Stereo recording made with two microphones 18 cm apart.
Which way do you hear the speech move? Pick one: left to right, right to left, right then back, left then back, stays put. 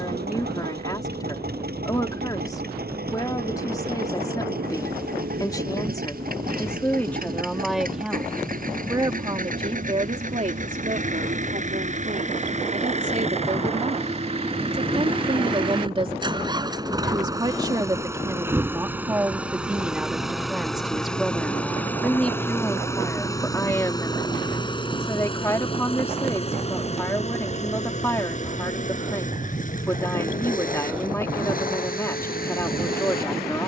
right then back.